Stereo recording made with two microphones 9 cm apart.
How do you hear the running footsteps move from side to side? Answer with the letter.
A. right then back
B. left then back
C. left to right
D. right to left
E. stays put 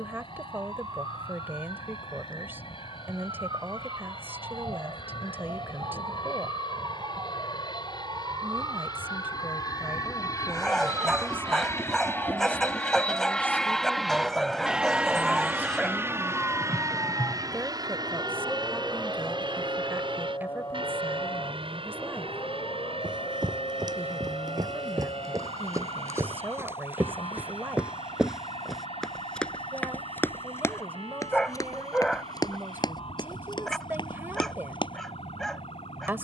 D.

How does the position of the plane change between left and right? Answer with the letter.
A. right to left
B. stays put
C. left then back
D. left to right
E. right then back
D.